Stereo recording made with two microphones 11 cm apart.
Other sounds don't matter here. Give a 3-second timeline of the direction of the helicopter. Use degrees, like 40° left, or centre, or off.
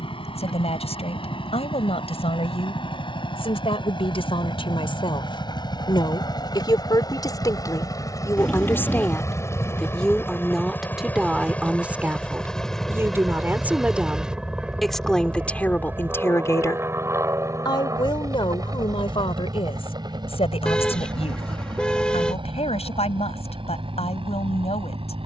60° left, 50° left, 40° left, 20° left, centre, 20° right, 40° right, 50° right, 50° right.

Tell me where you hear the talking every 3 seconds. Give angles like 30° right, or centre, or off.
70° left, 60° left, 30° left, centre, 10° right, 20° left, 60° left, 70° left, 70° left.